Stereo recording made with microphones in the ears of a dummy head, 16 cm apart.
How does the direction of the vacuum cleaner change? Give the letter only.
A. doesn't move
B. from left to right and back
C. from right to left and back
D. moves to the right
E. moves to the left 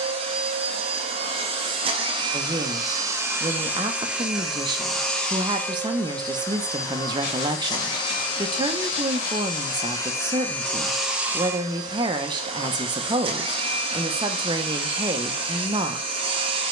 C.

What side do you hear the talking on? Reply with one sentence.
In this clip you hear the talking on the right.